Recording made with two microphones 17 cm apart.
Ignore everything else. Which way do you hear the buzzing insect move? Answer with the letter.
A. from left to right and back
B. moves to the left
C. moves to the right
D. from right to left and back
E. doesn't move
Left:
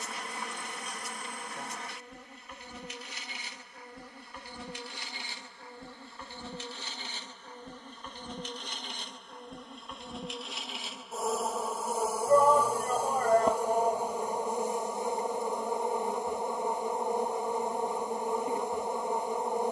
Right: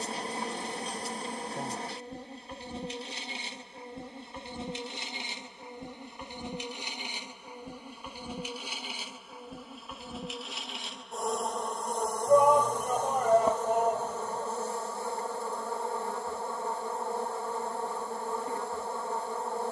B.